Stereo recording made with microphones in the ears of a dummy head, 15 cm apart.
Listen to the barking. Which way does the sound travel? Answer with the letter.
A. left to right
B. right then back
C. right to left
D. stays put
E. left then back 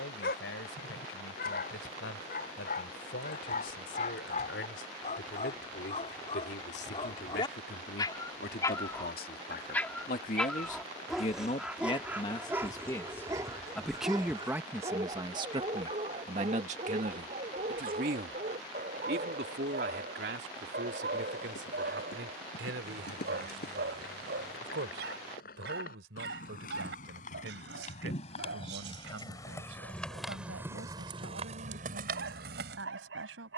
A.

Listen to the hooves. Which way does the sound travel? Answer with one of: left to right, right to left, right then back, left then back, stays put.
left to right.